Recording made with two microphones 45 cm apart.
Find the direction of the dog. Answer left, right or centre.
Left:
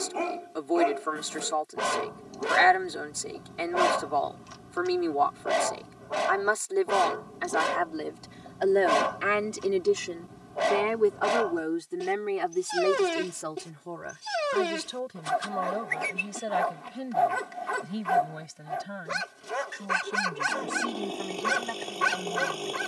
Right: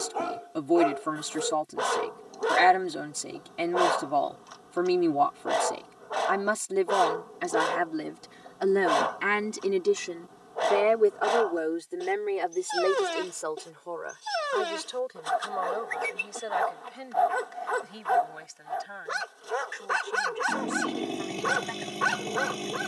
left.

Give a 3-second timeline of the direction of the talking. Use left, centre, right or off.
right, right, right, centre, left, left, left, left.